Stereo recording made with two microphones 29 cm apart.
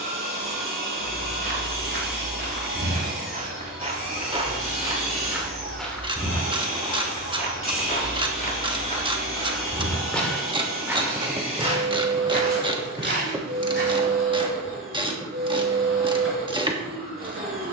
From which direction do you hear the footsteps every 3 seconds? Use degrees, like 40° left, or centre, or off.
40° right, 20° right, 20° left, centre, 40° right, off.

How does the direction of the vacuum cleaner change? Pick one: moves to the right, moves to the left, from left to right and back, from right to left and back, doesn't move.
doesn't move.